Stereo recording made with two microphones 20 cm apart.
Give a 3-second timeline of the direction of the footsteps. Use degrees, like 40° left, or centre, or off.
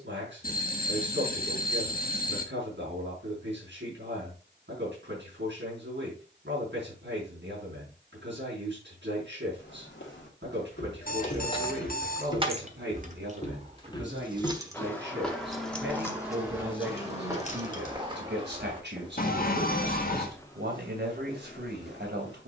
off, off, off, 60° left, 30° left, 10° right, 10° right, 50° left.